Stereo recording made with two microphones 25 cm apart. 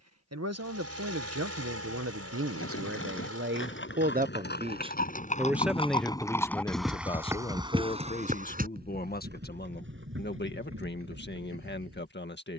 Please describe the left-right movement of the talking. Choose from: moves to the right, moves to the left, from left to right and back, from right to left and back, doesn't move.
moves to the left.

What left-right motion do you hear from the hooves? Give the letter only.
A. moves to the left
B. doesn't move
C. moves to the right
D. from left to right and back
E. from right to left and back
C.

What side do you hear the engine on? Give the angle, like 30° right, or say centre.
70° right.